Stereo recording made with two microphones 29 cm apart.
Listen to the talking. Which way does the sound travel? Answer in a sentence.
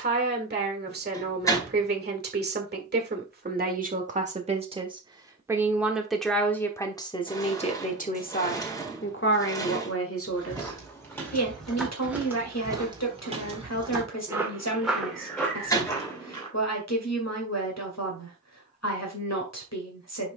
You can hear the talking travel towards the left.